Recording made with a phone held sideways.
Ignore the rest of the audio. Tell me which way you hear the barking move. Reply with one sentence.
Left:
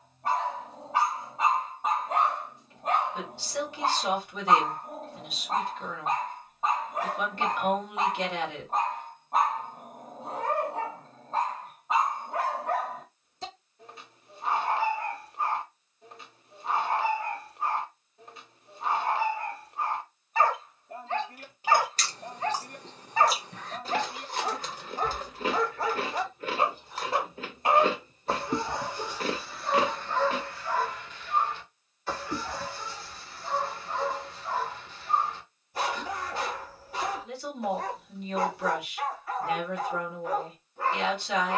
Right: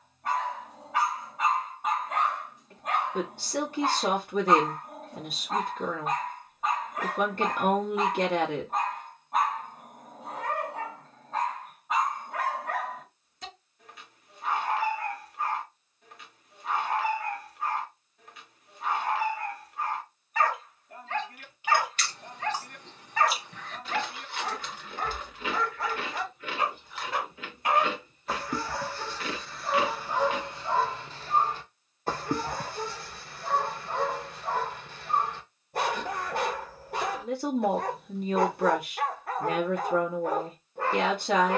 In this clip you hear the barking move from left to right.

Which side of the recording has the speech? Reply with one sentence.
In this clip you hear the speech on the right.